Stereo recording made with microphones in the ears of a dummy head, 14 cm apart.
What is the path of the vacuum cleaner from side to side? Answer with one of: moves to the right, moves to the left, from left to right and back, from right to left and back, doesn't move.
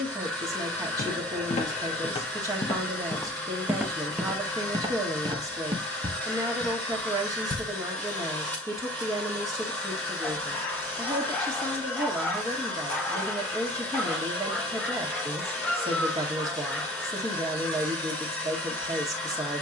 doesn't move.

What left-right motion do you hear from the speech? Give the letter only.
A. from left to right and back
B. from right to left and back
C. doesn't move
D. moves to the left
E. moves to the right
C.